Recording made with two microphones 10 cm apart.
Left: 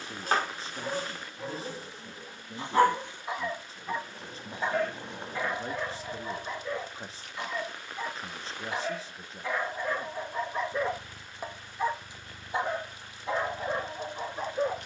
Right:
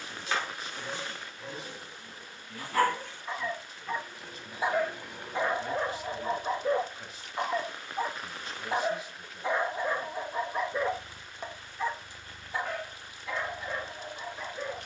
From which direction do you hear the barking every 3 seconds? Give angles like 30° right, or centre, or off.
40° left, 10° right, 40° right, 10° right, 30° left.